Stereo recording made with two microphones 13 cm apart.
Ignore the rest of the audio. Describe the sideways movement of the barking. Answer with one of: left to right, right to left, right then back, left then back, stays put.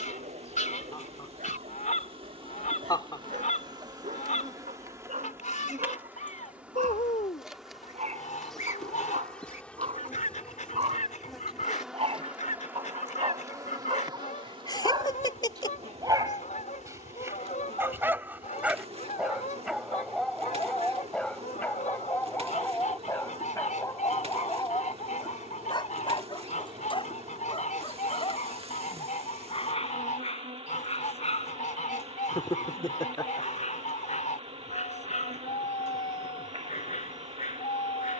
right to left.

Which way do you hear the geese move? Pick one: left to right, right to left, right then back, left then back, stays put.
stays put.